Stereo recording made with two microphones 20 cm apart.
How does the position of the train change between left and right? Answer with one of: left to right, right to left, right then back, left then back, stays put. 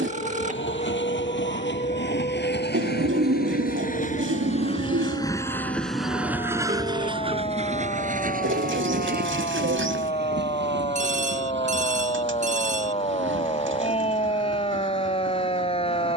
left to right.